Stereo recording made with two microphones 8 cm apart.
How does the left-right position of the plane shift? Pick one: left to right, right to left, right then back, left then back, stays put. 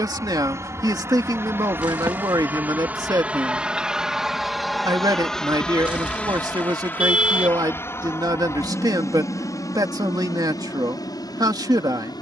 right to left.